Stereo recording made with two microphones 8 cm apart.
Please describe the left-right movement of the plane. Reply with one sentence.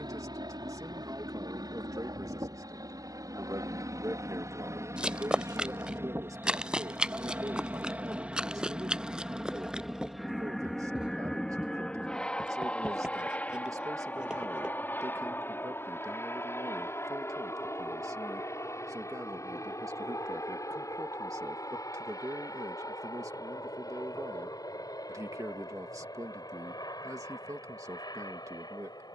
In this clip you hear the plane go from the right side to the left.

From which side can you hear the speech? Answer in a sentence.
You can hear the speech on the right.